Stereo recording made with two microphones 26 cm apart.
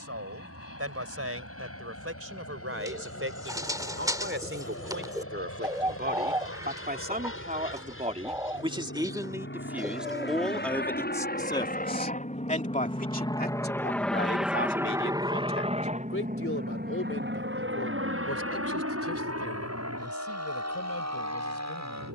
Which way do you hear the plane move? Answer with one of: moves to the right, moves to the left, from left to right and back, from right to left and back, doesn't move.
moves to the right.